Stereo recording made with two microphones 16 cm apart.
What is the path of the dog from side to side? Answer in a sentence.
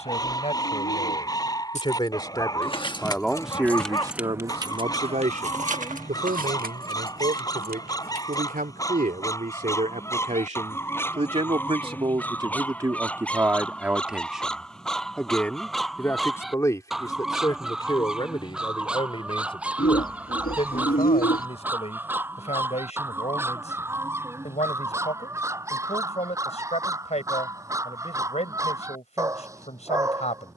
In this clip you hear the dog travel towards the right.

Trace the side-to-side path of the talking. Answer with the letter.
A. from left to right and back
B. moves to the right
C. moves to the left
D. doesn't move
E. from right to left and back
A.